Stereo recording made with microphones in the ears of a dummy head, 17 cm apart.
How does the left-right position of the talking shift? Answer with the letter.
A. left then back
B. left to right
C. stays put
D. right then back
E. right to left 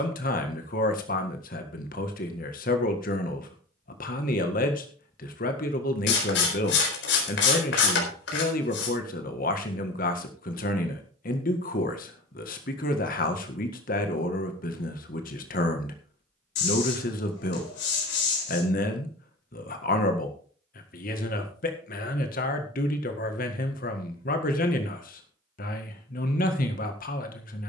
C.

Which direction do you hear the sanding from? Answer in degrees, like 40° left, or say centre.
60° left.